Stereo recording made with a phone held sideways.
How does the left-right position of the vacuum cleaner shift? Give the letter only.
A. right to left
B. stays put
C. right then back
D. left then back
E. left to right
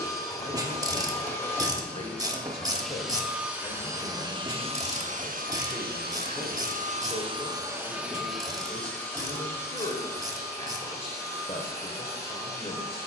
C.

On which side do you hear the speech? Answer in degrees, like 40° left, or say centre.
40° left.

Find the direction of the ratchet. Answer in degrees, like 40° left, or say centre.
20° right.